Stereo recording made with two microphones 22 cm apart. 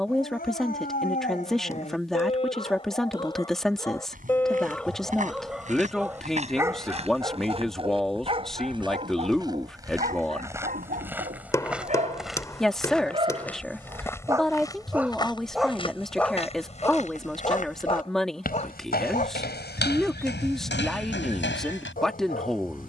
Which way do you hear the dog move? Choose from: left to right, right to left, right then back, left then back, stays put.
right then back.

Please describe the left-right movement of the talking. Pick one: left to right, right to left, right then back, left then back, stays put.
stays put.